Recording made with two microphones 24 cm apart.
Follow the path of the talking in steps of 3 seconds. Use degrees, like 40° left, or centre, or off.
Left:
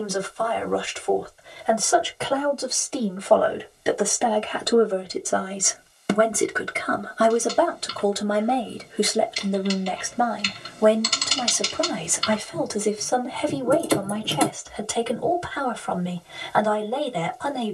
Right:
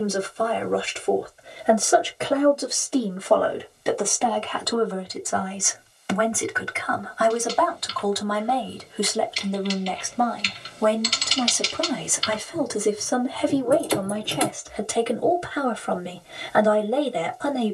20° right, 20° left, 30° left, 10° left, 10° right, 20° right.